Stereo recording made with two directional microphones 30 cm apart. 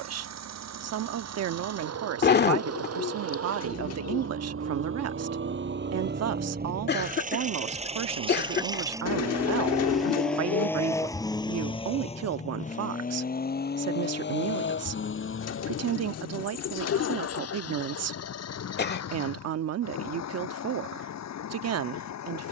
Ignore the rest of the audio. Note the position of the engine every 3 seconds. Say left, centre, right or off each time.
right, right, right, centre, left, left, left, left.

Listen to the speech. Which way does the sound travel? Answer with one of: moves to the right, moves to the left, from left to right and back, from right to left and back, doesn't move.
doesn't move.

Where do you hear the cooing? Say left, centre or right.
left.